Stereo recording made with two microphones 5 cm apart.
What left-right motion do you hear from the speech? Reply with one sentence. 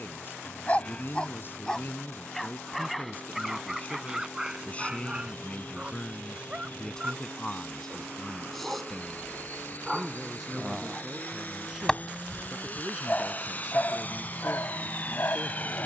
In this clip you hear the speech move to the right.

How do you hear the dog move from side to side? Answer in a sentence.
You can hear the dog move from left to right and back again.